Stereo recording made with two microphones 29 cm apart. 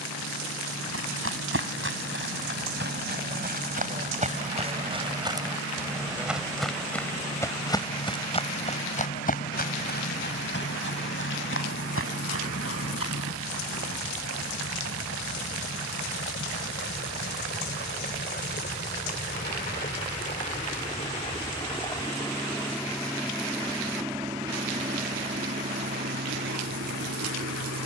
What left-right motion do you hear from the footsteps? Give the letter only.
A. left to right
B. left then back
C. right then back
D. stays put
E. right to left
E.